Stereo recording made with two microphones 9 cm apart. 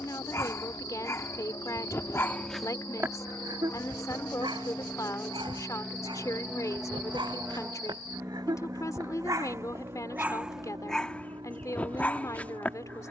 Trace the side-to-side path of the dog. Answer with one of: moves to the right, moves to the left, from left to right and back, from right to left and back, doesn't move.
from left to right and back.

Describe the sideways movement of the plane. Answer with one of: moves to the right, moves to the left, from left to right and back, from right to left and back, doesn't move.
moves to the right.